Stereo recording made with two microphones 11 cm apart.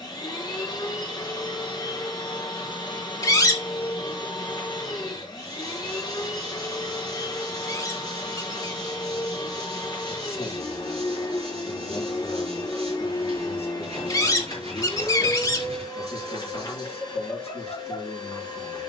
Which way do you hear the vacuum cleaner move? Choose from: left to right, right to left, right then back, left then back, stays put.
stays put.